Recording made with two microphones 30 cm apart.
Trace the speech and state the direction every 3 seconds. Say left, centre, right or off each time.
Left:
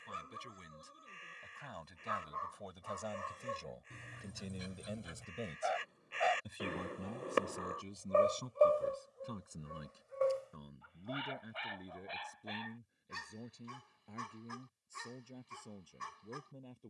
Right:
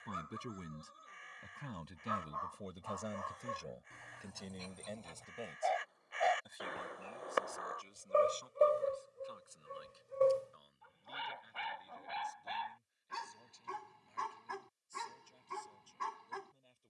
right, centre, left, left, left, left.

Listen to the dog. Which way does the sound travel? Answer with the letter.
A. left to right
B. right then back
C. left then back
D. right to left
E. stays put
A.